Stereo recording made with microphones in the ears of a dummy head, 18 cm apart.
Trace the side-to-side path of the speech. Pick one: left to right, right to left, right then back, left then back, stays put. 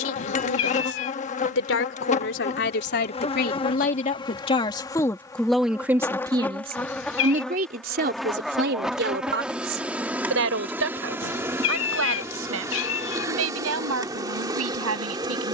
left to right.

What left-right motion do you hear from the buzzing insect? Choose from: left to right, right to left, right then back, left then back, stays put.
left to right.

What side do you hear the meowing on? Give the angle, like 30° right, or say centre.
60° left.